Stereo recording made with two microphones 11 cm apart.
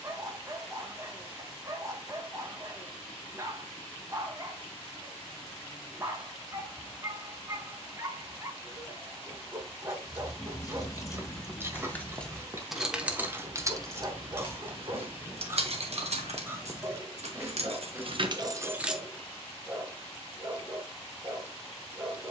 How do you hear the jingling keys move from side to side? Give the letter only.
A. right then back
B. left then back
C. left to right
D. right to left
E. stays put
A.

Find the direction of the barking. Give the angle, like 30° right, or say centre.
30° right.